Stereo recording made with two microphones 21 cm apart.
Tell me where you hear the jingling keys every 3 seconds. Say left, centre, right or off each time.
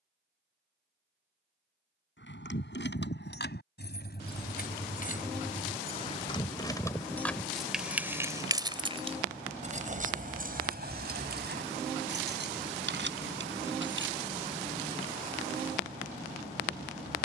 left, left, centre, right, right, off.